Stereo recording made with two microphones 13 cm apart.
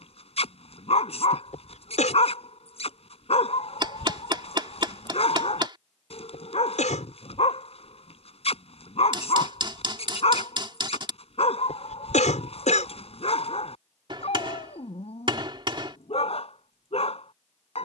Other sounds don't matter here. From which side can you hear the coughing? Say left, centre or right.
left.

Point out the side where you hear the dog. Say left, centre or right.
left.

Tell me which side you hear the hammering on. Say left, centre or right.
right.